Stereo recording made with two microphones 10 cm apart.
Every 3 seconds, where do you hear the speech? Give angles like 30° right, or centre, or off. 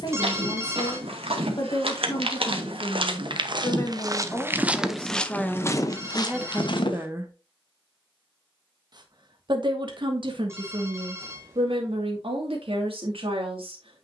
40° left, 20° left, 20° right, 60° right, 70° right.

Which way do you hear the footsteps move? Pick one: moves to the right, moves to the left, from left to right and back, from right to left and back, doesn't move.
moves to the left.